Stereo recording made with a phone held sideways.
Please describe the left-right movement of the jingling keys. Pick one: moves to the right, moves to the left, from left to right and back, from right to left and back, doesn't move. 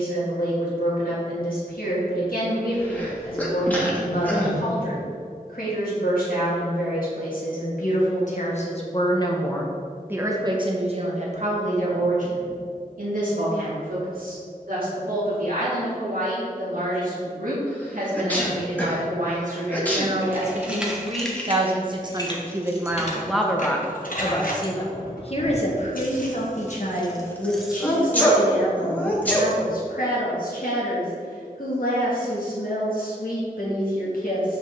from right to left and back.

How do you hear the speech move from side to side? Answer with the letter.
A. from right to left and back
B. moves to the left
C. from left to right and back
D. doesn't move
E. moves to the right
C.